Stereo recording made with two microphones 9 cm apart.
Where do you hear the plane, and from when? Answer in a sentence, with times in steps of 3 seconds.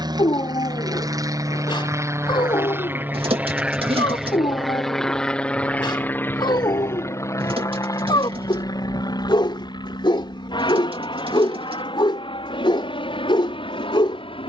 You can hear the plane on the right from 0 s, in the centre from 3 s and on the left from 6 s.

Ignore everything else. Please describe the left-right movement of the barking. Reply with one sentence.
You can hear the barking stay put.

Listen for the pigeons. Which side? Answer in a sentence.
You can hear the pigeons on the right.